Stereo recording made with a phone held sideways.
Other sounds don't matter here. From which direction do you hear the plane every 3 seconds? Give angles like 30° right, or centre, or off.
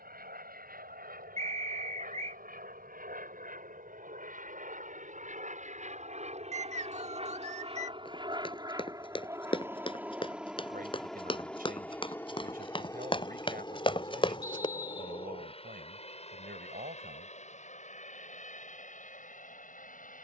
70° right, 60° right, 40° right, centre, 20° left, 40° left, 50° left.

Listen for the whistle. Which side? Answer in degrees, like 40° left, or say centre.
40° right.